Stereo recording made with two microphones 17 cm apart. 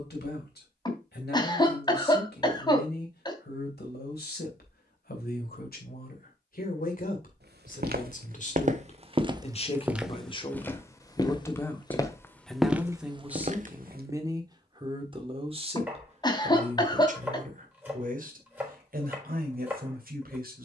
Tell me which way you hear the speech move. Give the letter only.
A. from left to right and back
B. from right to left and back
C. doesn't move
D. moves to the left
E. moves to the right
E.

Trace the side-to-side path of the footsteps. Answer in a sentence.
You can hear the footsteps move from right to left and back again.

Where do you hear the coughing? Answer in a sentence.
In this clip you hear the coughing on the left.